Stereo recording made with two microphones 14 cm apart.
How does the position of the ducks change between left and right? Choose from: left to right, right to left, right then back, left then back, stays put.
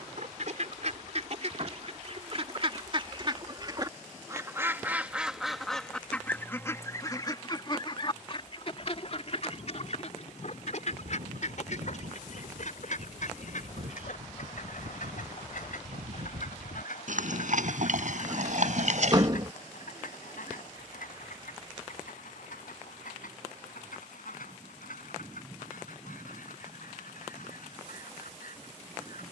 right to left.